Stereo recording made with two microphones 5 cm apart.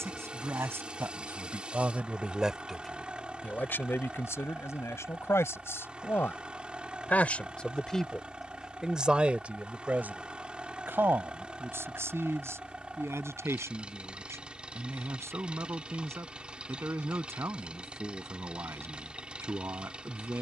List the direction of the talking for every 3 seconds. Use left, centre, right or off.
right, left, left, right, right, right, right.